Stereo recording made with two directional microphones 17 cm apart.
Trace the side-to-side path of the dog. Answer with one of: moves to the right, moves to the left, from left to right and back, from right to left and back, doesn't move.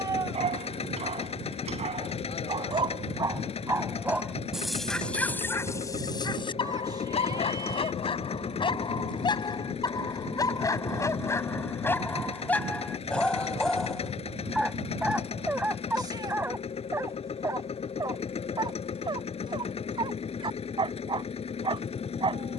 from right to left and back.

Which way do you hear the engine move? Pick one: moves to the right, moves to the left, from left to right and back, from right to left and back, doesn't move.
doesn't move.